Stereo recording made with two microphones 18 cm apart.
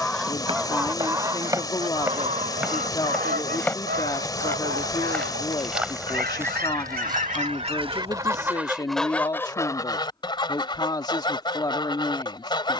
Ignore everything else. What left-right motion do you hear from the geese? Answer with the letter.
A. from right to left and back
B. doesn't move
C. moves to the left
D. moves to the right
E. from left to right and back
E.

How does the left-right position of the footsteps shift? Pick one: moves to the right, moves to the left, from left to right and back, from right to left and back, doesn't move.
from right to left and back.